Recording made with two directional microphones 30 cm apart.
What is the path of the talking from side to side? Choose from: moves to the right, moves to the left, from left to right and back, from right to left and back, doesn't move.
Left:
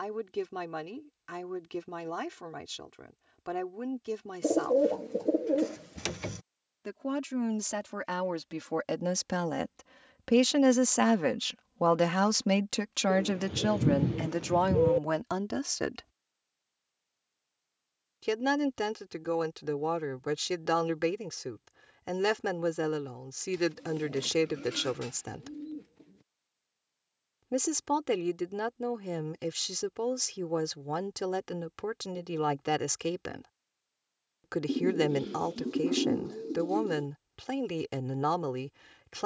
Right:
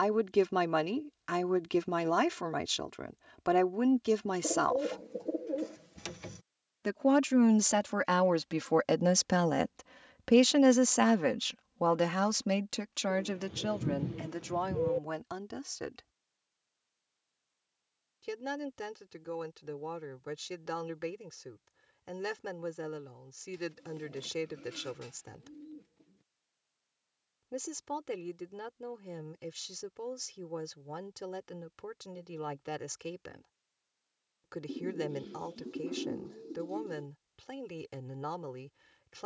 moves to the left.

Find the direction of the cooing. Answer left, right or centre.
left.